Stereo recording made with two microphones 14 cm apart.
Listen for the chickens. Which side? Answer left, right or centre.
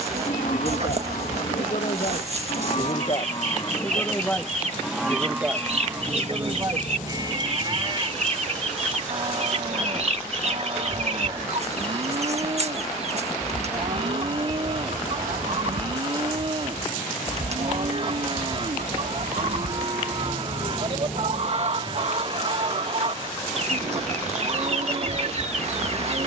right.